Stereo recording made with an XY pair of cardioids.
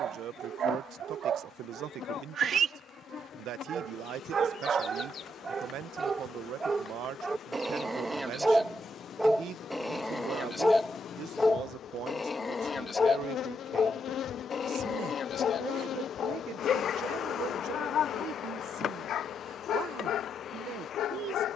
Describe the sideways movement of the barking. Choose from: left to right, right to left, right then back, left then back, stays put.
right to left.